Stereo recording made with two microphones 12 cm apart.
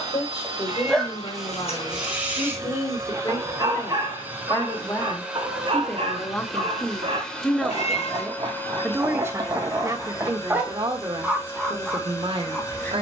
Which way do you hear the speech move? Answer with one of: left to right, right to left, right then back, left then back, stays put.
left to right.